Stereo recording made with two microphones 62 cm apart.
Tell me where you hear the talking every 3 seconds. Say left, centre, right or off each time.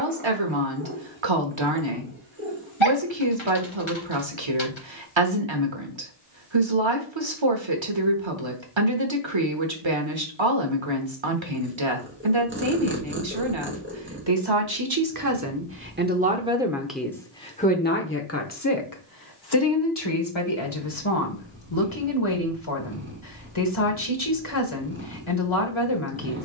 right, right, right, right, right, centre, left, left, left.